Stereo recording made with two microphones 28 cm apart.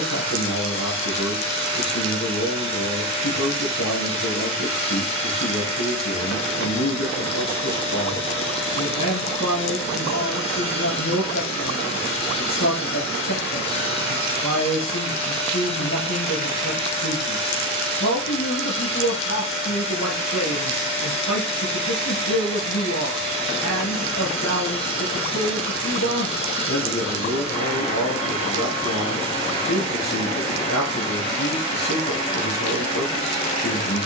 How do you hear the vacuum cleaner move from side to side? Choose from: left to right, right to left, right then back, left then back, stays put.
stays put.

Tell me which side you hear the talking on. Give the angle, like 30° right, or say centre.
70° left.